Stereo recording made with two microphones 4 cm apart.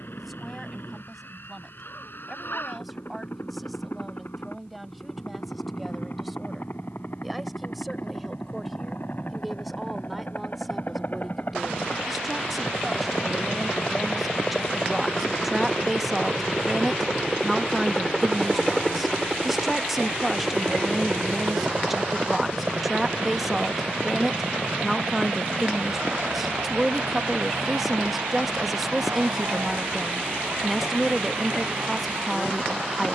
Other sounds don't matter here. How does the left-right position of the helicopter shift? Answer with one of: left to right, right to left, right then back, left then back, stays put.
left to right.